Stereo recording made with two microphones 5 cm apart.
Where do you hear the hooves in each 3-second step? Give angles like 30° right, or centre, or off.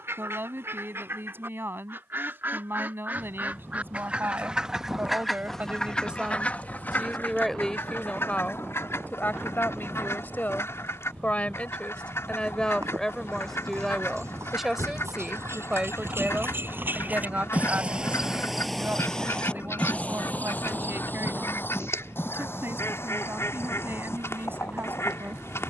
off, off, off, off, 70° right, 50° right, 20° left, 50° left, 60° left.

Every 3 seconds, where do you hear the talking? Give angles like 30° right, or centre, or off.
50° right, 40° right, 10° left, 40° left, 10° left, 20° right, 40° right, 50° right, 50° right.